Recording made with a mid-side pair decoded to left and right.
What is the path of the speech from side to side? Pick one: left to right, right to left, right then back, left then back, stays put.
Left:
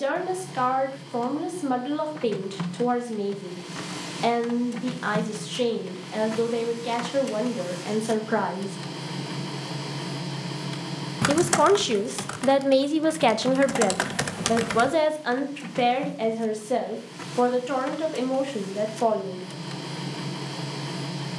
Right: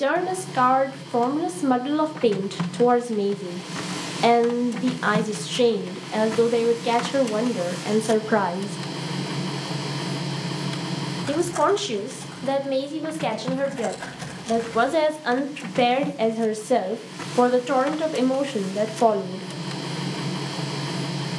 left then back.